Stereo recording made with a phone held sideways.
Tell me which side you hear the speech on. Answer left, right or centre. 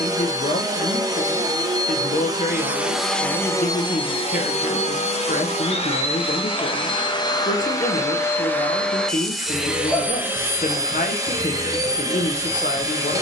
left.